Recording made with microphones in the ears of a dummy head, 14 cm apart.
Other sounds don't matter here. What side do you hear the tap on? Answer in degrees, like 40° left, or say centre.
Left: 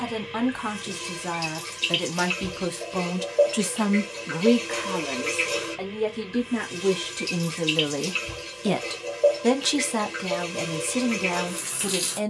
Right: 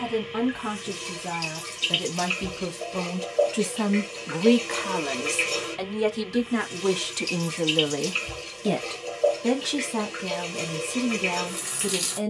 centre.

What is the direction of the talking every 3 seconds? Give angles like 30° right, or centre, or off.
50° left, 10° right, 20° right, 50° left.